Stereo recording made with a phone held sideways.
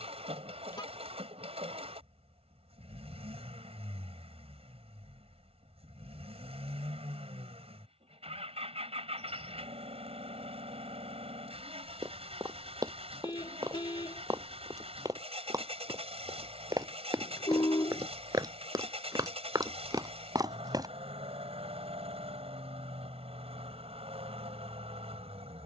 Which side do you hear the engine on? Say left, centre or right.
right.